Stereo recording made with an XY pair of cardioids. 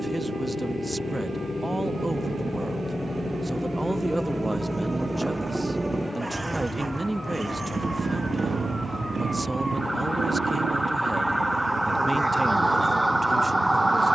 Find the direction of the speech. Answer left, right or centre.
centre.